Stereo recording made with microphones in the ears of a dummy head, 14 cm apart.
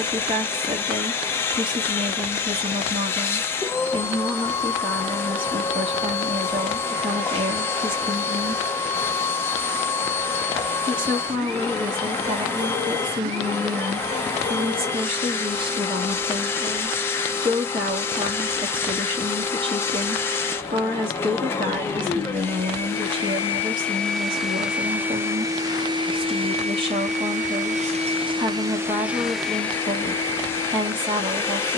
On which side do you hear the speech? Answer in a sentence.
In this clip you hear the speech on the right.